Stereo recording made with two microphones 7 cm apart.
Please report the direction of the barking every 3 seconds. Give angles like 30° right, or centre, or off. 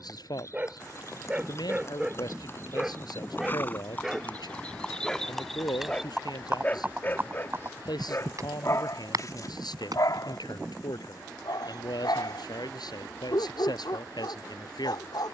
10° right, centre, 40° left, 60° left, 80° left.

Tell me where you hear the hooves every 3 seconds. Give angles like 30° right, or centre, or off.
40° left, 20° left, 30° right, 60° right, off.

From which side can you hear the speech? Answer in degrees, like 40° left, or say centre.
70° left.